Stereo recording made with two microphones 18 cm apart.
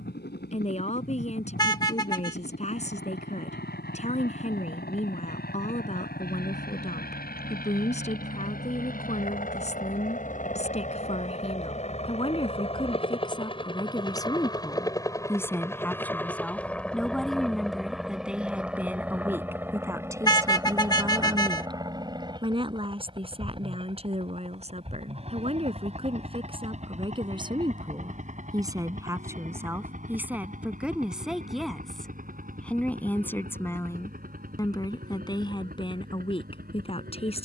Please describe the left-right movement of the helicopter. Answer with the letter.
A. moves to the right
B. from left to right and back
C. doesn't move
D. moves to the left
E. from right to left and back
A.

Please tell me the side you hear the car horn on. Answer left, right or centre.
left.